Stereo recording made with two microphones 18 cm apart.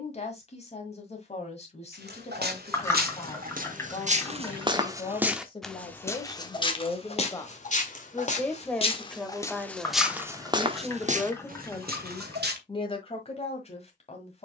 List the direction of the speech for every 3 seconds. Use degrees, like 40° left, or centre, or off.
40° left, 30° left, 20° left, centre, 30° left.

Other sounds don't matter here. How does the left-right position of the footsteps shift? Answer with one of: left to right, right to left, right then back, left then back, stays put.
left then back.